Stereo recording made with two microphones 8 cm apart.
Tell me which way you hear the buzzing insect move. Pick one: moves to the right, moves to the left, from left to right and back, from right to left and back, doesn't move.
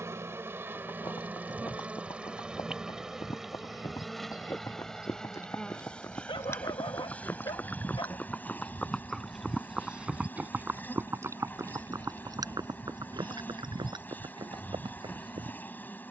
moves to the left.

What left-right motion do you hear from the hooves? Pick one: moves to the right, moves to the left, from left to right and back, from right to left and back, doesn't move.
moves to the right.